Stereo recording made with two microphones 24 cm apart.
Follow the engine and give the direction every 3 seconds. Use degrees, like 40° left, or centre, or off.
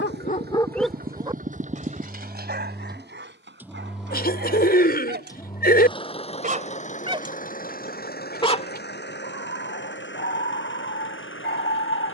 30° right, centre, 30° left, 50° left.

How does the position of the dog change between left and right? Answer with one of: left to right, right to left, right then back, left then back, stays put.
right then back.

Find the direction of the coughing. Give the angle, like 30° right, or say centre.
40° left.